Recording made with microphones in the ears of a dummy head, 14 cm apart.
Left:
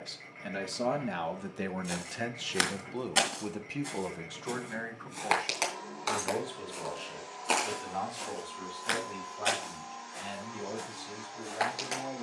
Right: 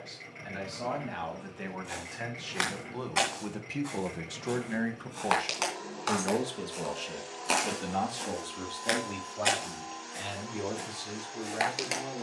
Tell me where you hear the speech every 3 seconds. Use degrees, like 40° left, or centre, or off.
50° left, 20° right, 60° right, 70° right.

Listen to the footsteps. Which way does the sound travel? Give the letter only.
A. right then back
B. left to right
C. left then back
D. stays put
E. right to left
B.